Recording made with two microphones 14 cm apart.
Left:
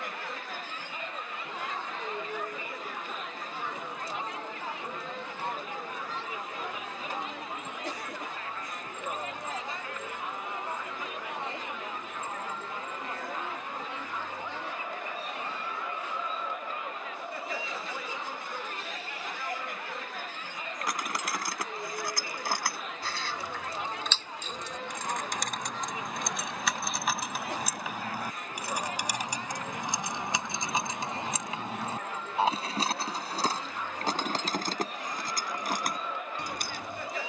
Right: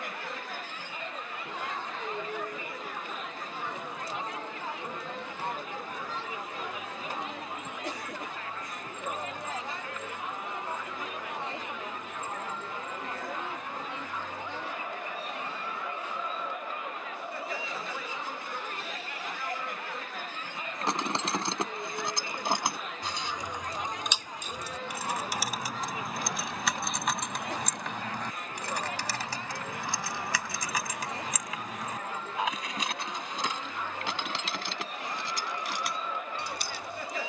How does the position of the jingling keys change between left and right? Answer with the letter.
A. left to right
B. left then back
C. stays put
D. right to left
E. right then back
D.